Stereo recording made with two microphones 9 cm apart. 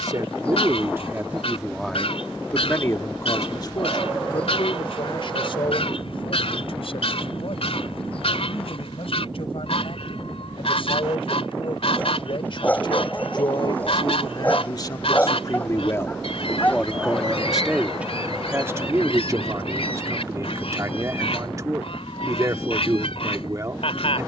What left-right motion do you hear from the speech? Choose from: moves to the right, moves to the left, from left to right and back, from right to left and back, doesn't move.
from right to left and back.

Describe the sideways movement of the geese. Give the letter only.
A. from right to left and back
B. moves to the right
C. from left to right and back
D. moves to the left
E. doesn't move
E.